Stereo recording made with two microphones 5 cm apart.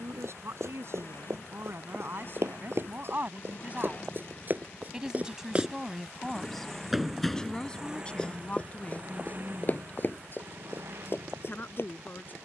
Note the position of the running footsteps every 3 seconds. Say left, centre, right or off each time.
right, right, centre, left.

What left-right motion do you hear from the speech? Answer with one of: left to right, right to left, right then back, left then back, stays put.
right to left.